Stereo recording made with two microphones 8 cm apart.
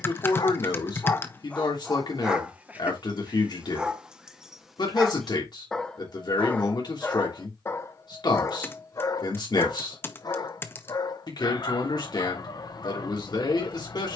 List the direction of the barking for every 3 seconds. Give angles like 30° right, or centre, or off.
10° left, 10° right, 30° left, 50° left, 50° left.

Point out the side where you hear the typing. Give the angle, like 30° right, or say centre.
30° left.